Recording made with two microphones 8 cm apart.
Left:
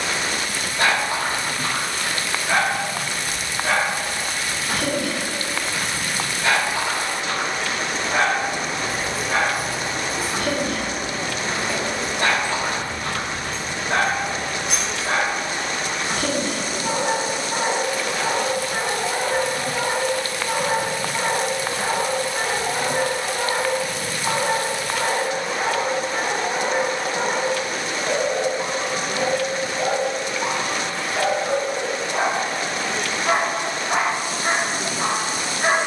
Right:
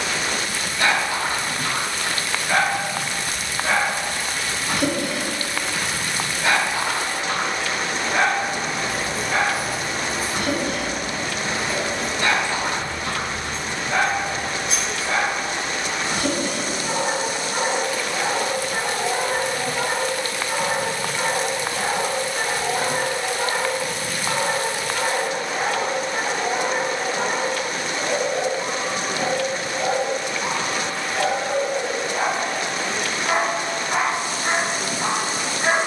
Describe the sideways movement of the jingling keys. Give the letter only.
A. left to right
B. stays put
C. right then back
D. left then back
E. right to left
C.